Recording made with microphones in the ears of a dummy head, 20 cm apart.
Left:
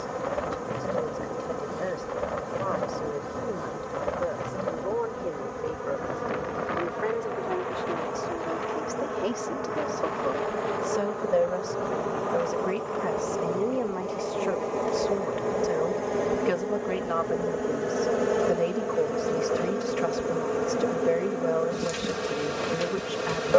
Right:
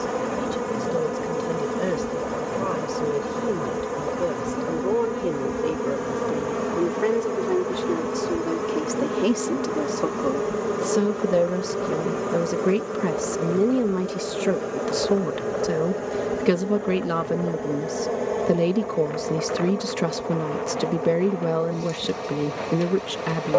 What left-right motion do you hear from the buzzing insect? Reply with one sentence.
You can hear the buzzing insect go from the right side to the left.